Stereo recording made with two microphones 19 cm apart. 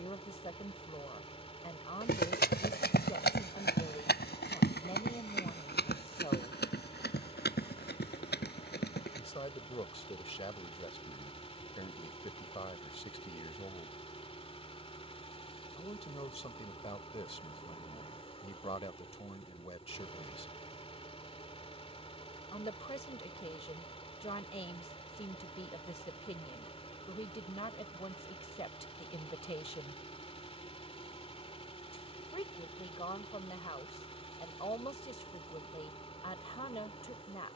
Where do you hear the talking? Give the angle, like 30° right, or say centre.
30° left.